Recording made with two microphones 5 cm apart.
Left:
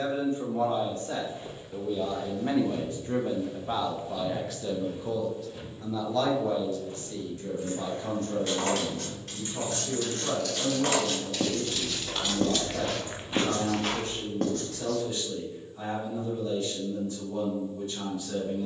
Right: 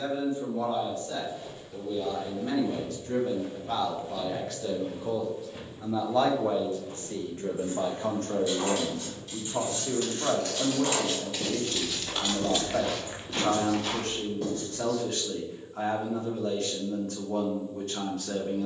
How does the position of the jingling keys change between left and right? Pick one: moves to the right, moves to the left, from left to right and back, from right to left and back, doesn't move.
moves to the right.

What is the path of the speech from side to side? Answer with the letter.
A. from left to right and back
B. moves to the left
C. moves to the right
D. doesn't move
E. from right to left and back
C.